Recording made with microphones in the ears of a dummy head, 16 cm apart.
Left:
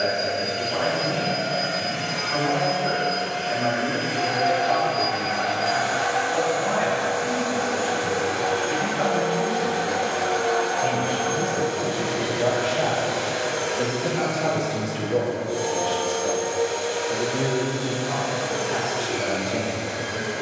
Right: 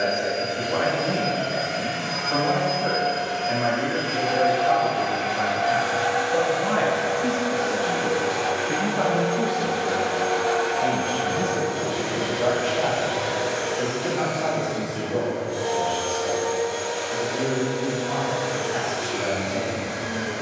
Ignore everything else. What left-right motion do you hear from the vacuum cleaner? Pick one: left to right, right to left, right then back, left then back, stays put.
stays put.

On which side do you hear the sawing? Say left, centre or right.
right.